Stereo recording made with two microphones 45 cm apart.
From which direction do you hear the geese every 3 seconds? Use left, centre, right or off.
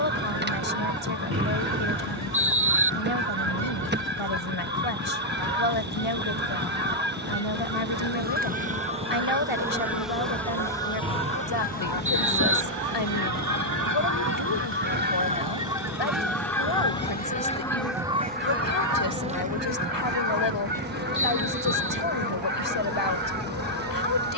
right, right, right, right, right, centre, right, right.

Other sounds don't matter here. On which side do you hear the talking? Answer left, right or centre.
left.